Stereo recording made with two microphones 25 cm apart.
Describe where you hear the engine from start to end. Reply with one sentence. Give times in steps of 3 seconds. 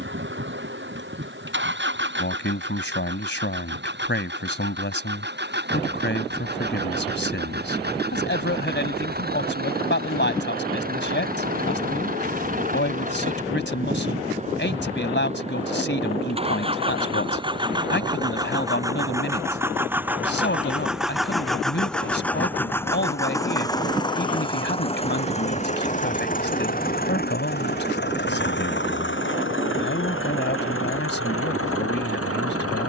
You can hear the engine on the right from 0 s, in the centre from 18 s and on the left from 24 s.